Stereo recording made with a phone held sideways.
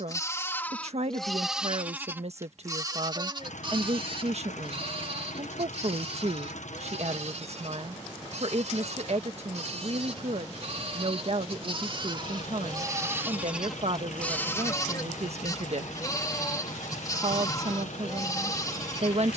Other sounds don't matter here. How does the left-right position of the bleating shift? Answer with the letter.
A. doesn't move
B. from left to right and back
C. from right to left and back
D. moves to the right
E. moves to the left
B.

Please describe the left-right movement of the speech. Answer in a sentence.
You can hear the speech stay put.